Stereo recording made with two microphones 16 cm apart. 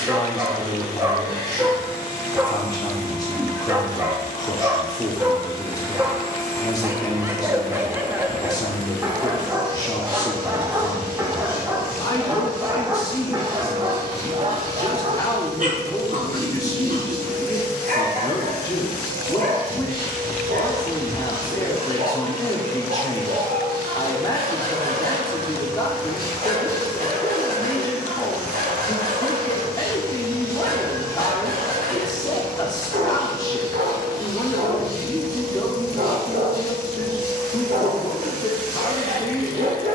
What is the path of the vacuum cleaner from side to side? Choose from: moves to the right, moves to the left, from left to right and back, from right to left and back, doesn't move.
doesn't move.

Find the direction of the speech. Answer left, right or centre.
left.